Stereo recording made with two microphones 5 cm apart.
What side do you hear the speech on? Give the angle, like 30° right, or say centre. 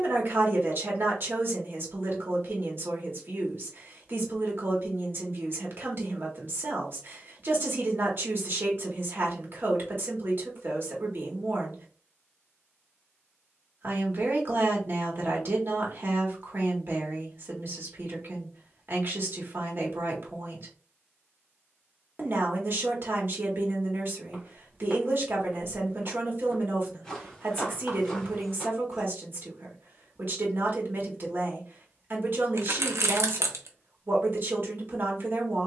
50° right.